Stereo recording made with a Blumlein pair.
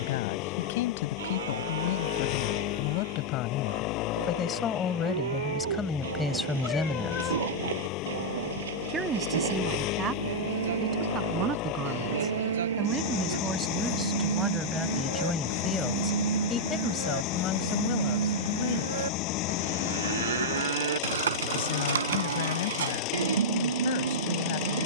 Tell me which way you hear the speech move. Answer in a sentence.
You can hear the speech go right and come back.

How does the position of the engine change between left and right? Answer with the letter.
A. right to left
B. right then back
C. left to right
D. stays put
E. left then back
D.